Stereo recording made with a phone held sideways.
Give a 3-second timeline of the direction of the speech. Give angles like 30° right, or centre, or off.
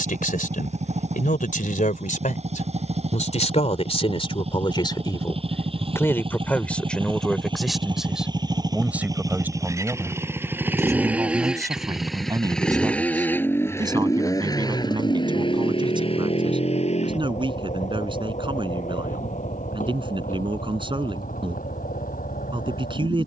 70° left, 40° left, centre, 20° right, 30° right, 30° right, 30° right, 30° right.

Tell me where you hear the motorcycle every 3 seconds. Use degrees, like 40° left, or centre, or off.
50° right, 50° right, 30° right, 20° right, 10° left, 40° left, 60° left, 70° left.